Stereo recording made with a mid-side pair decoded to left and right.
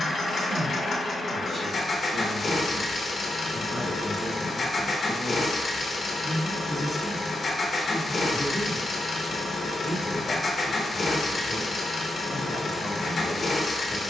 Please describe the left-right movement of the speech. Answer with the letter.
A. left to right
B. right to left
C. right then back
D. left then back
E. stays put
B.